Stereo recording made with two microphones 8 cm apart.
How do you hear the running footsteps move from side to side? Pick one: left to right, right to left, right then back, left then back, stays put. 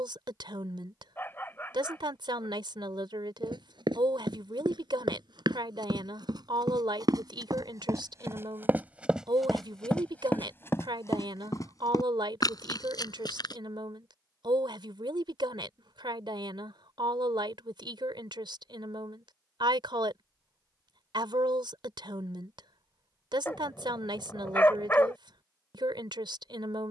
right to left.